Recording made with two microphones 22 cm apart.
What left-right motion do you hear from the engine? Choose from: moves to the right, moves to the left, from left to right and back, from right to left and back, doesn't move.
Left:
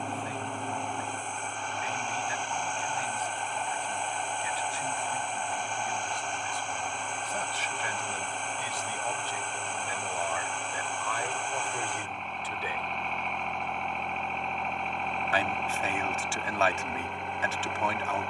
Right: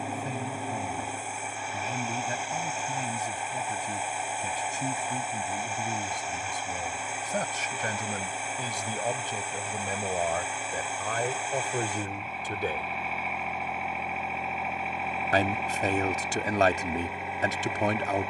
doesn't move.